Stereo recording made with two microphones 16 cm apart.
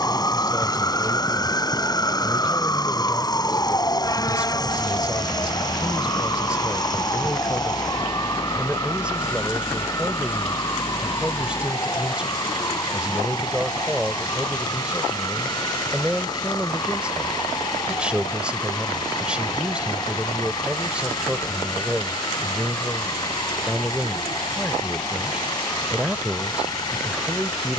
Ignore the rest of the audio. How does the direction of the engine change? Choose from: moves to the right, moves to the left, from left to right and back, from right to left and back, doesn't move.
doesn't move.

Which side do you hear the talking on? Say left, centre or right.
centre.